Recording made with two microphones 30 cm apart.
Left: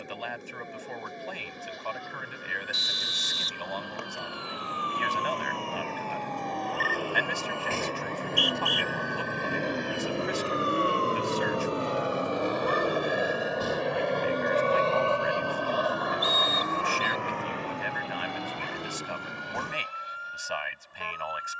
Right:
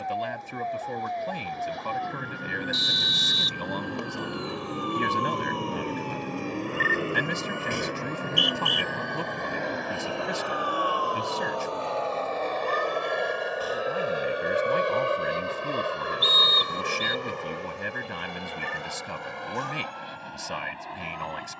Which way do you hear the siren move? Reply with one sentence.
You can hear the siren move to the left.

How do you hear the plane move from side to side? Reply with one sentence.
In this clip you hear the plane travel towards the right.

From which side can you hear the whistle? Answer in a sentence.
In this clip you hear the whistle on the right.